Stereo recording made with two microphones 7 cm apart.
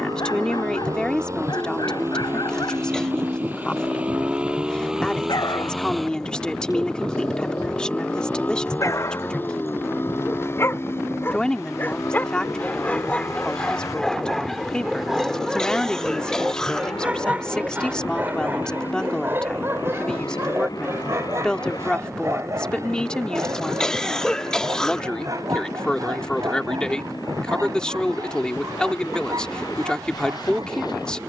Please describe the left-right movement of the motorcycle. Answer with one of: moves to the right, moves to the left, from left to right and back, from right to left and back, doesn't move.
moves to the left.